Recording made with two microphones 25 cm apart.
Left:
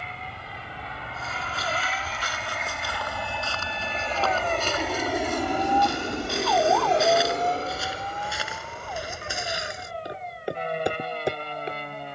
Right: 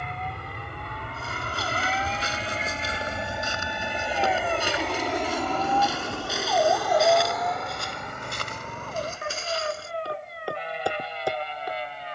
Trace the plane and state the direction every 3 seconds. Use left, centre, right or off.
right, centre, left, left.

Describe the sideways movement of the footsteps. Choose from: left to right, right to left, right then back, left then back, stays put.
right to left.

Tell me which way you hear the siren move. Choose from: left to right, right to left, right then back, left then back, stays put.
left to right.